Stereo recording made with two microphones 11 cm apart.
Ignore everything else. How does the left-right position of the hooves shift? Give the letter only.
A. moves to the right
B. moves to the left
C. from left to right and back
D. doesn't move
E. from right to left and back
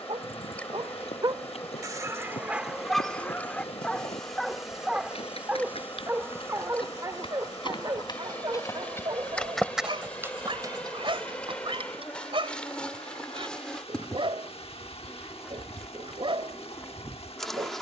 A.